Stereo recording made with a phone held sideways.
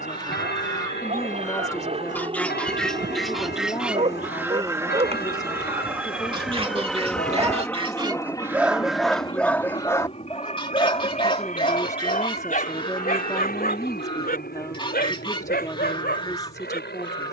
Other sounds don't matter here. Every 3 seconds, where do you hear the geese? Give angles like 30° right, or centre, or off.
20° left, 10° right, 30° right, 20° left, 30° left, 30° left.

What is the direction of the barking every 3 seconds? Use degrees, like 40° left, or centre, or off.
50° right, 40° right, 20° right, 30° left, 60° left, 80° left.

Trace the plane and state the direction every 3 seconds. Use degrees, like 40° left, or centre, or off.
40° right, 20° right, 10° left, 40° left, 60° left, 70° left.